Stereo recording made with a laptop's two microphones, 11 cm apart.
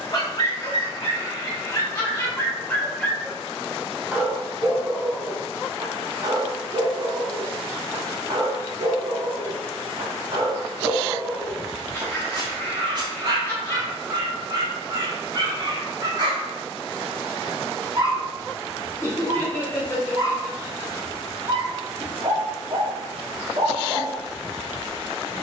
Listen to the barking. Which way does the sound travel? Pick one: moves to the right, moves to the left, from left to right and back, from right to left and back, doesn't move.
moves to the right.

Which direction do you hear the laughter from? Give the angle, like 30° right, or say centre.
20° left.